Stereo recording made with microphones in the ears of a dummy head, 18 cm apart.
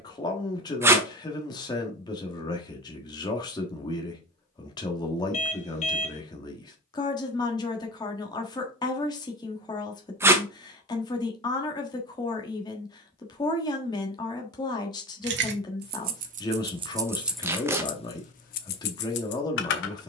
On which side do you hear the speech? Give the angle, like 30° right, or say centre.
20° left.